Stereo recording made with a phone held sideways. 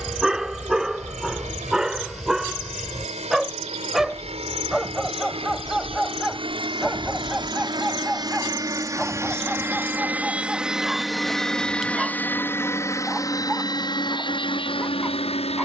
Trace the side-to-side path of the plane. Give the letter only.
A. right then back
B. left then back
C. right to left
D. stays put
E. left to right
C.